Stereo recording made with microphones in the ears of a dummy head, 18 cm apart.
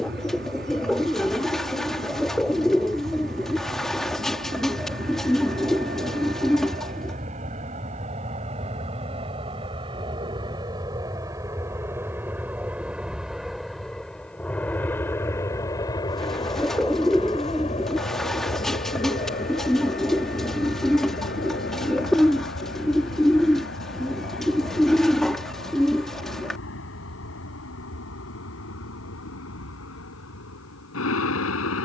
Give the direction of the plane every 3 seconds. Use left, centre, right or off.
right, right, right, right, centre, left, left, left, left, left, left.